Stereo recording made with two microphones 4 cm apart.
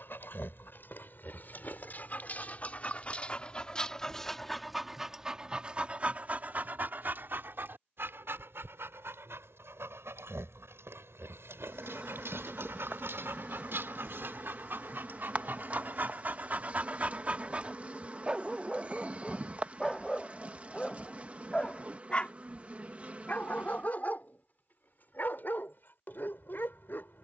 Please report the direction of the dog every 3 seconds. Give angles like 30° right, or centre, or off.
50° left, centre, 50° right, 70° right, 60° right, 40° right, centre, 30° left, 50° left.